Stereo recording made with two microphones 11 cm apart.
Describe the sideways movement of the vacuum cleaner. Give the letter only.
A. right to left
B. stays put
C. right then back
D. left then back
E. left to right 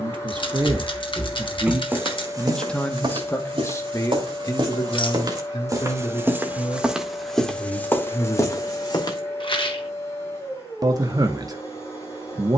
B.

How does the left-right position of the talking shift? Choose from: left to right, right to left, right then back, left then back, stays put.
left then back.